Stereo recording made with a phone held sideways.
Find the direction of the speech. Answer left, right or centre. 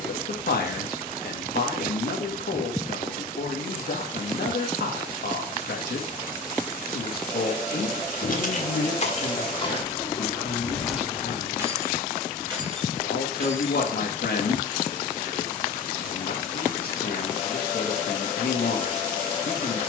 left.